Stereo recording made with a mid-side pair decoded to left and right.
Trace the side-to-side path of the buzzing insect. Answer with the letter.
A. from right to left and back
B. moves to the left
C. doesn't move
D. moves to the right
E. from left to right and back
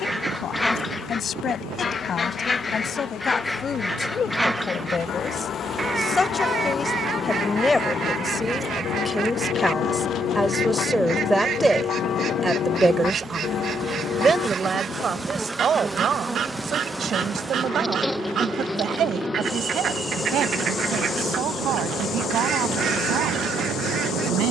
E.